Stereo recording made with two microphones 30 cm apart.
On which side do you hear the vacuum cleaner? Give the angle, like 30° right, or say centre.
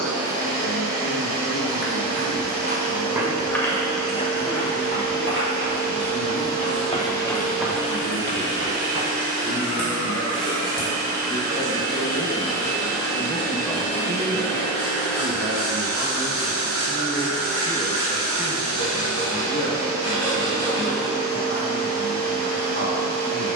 20° left.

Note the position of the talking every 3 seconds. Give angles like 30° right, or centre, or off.
50° left, 50° left, 50° left, 40° left, centre, 10° right, 40° left, 50° left.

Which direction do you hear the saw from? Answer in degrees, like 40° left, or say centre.
50° left.